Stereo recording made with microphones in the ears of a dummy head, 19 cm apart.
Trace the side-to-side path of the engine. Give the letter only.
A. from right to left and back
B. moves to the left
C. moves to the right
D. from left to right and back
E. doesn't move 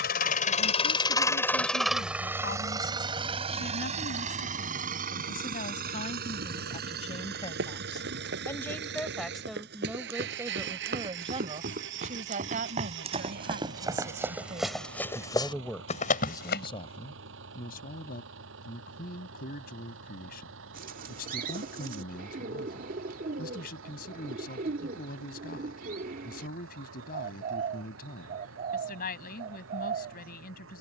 C.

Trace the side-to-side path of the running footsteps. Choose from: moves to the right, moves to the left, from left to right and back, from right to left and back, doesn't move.
moves to the left.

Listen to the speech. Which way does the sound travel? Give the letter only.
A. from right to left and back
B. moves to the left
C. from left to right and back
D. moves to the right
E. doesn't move
C.